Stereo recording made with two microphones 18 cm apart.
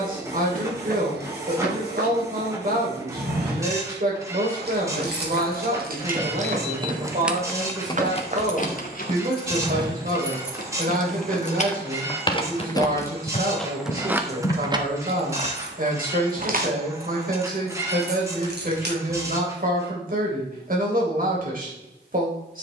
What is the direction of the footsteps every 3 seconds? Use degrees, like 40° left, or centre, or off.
70° right, 60° right, 50° right, 10° right, 40° left, off, off, off.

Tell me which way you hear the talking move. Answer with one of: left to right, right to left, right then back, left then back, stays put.
stays put.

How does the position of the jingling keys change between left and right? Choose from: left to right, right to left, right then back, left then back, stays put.
left then back.